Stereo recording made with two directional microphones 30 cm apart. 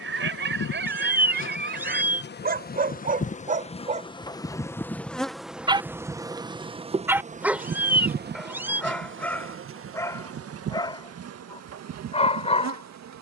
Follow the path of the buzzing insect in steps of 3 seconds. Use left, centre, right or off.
left, centre, right, right, right.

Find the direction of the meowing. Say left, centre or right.
centre.